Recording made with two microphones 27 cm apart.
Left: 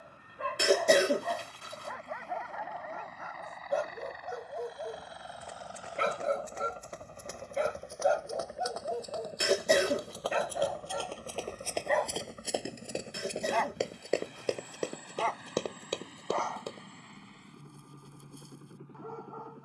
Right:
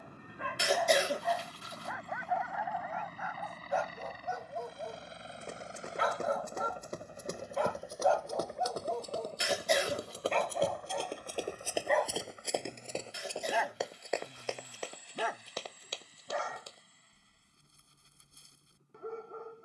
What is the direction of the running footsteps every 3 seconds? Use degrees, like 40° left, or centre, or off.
off, 50° right, 50° right, 20° right, 20° left, 60° left, off.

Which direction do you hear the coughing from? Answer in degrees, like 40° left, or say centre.
60° left.